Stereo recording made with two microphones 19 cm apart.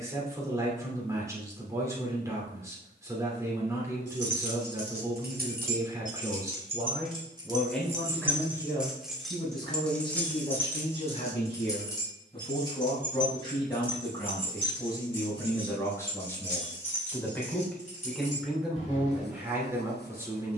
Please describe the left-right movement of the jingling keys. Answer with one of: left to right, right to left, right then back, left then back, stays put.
right to left.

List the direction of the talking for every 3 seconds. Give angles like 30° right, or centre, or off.
20° right, 20° right, centre, 30° left, 20° left, 10° left, 10° right.